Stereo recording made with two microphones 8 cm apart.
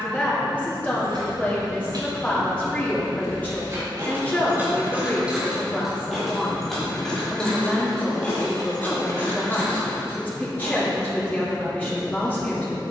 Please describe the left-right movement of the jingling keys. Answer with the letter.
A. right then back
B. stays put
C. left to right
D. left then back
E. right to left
E.